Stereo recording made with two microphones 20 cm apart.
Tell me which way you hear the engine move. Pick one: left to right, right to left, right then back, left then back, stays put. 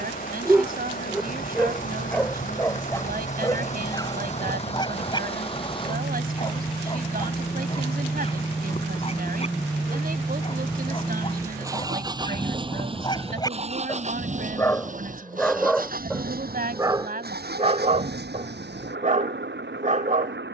left to right.